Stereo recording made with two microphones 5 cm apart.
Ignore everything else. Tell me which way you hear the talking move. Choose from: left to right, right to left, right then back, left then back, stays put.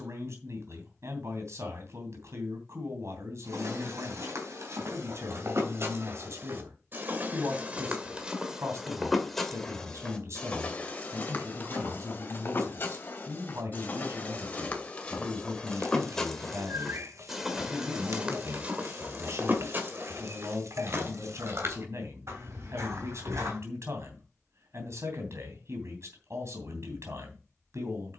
stays put.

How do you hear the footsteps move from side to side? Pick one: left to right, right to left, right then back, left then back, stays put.
left then back.